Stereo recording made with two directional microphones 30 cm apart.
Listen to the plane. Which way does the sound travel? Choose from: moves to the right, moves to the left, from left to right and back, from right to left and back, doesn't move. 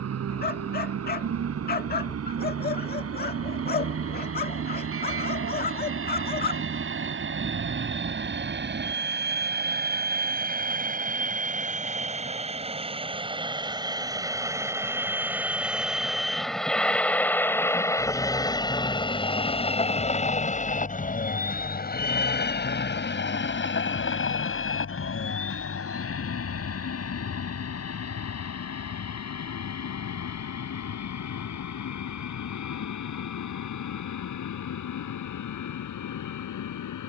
moves to the left.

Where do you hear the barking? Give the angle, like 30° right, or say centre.
30° left.